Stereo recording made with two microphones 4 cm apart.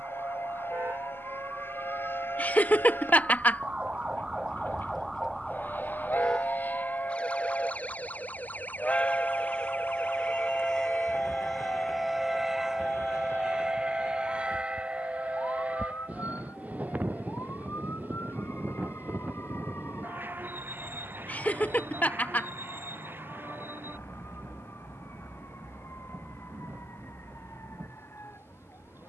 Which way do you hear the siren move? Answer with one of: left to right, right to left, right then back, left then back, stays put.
right to left.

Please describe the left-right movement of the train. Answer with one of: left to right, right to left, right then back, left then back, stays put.
left to right.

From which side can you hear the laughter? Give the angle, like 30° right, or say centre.
40° left.